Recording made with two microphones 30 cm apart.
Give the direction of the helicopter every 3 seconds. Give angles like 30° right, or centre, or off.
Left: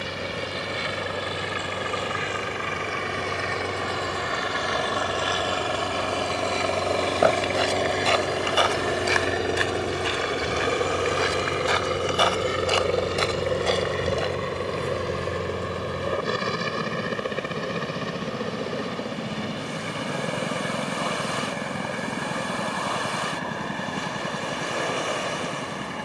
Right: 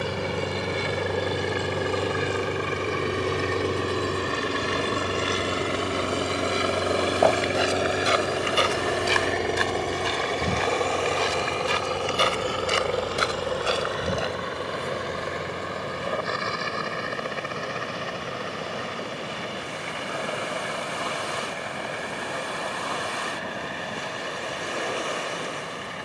50° right, 30° right, 10° right, 10° left, 30° left, 40° left, 40° left, 50° left, 50° left.